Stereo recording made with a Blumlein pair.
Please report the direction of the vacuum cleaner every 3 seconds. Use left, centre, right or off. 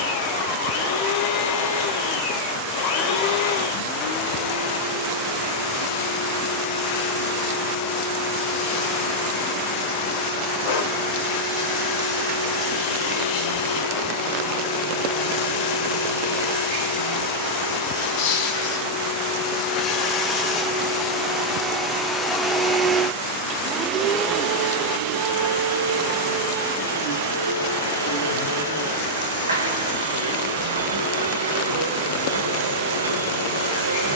left, left, left, left, left, left, left, centre, right, right, right, right.